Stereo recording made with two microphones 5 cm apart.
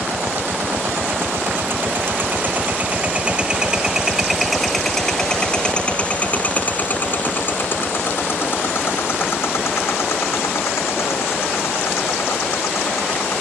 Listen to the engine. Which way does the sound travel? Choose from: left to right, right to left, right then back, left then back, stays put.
right to left.